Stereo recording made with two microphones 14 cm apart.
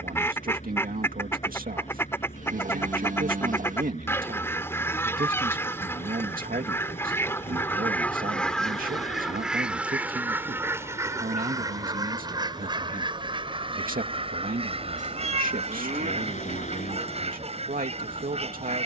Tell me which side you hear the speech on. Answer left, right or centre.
right.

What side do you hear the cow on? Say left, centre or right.
right.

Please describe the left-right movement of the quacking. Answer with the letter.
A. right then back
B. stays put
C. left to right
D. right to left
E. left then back
C.